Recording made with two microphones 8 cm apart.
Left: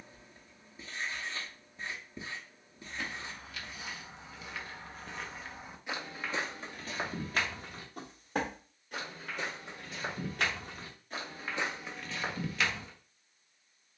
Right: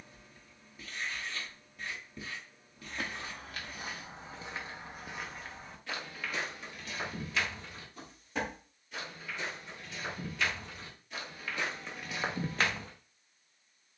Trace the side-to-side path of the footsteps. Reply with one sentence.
In this clip you hear the footsteps go left and come back.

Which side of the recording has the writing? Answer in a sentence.
In this clip you hear the writing on the left.